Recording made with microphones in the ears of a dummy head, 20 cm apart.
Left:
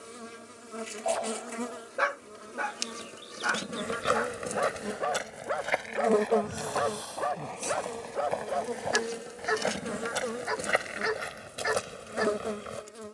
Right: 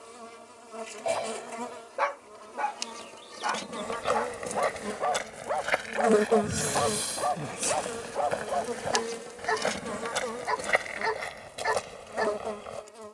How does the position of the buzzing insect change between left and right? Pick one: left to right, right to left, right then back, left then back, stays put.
right then back.